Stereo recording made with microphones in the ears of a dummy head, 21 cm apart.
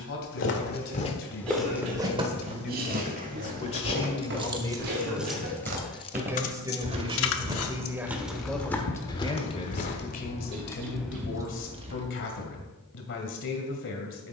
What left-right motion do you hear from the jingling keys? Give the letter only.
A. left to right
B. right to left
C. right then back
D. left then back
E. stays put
D.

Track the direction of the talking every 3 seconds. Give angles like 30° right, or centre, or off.
50° left, 20° left, 10° right, 40° left, 50° left.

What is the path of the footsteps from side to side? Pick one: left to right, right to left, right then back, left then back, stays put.
right then back.